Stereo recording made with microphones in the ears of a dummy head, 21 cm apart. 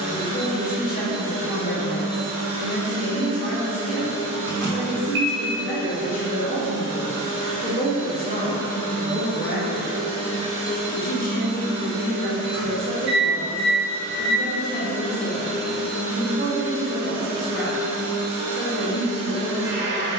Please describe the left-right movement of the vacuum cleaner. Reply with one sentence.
You can hear the vacuum cleaner move to the right.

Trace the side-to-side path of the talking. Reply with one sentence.
You can hear the talking stay put.